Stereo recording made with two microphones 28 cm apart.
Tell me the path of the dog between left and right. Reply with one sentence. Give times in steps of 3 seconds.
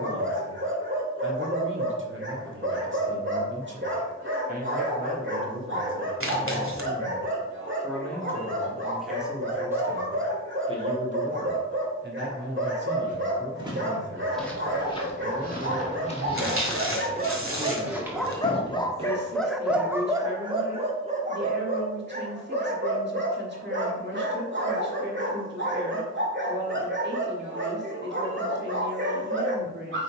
In this clip you hear the dog on the right from 0 s, in the centre from 18 s and on the right from 21 s.